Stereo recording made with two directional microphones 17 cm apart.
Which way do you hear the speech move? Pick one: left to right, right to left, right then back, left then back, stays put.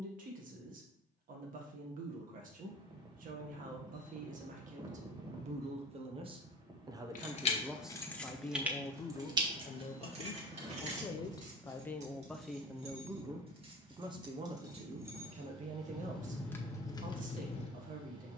left then back.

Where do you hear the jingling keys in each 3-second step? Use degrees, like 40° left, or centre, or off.
off, off, 10° left, 40° right, 30° right, 10° left.